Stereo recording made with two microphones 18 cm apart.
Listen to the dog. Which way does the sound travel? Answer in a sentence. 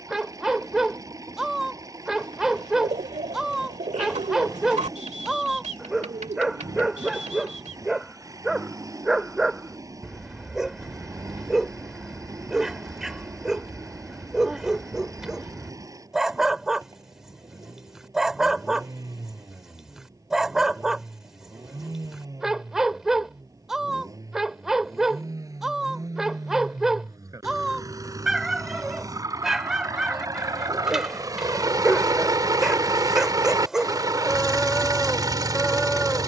You can hear the dog stay in one place.